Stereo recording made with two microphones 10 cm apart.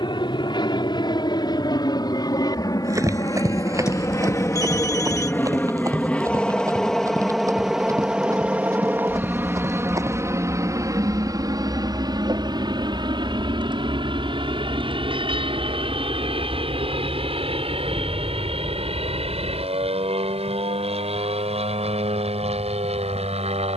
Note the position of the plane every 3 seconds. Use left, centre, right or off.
left, left, centre, right, right, right, right, right.